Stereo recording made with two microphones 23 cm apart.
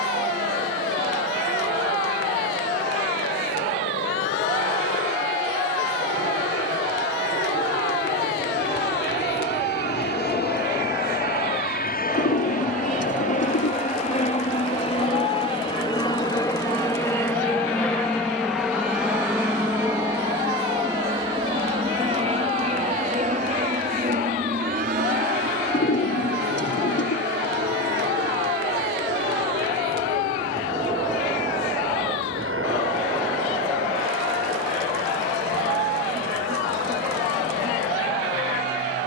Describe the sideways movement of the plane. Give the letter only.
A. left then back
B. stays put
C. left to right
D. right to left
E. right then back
C.